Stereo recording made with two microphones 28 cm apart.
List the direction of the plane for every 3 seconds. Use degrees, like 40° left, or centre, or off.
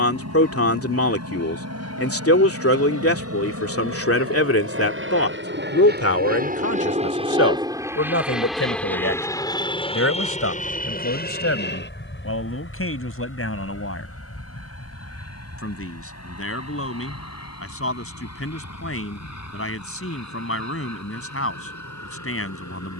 70° right, 50° right, 20° right, 20° left, 50° left, 60° left, 60° left, 60° left.